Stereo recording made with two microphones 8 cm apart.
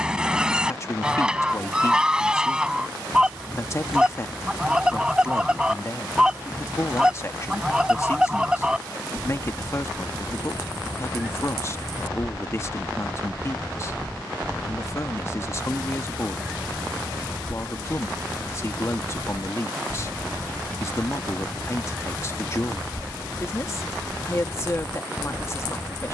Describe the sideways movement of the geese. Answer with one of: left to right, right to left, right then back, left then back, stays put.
stays put.